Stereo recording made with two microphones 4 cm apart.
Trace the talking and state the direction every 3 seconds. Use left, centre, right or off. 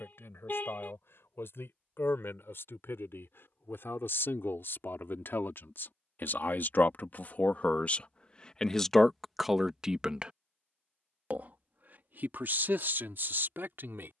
left, left, left, right, right.